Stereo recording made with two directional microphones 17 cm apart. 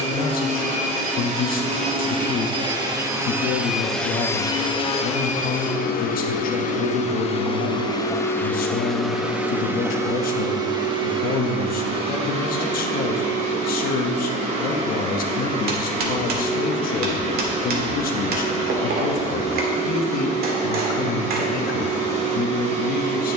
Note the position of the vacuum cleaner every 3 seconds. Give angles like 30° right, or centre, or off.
40° right, 20° left, 30° left, 20° right, 40° right, 40° right, 40° right, 40° right.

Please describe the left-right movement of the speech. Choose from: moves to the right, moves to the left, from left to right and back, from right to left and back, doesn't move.
doesn't move.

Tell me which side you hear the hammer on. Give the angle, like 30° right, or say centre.
60° right.